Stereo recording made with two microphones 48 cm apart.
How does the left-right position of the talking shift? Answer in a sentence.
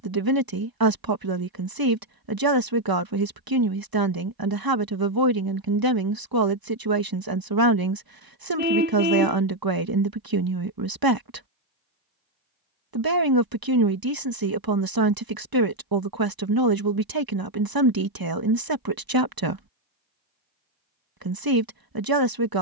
In this clip you hear the talking stay put.